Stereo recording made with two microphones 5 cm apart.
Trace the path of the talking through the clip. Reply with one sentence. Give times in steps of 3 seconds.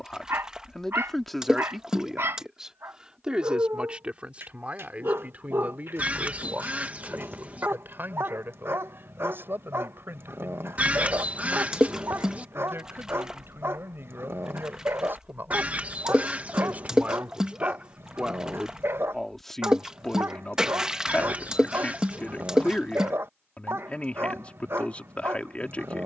You can hear the talking in the centre from 0 s, on the right from 3 s, in the centre from 18 s and on the left from 21 s.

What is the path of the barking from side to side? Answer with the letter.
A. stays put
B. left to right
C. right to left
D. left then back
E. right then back
A.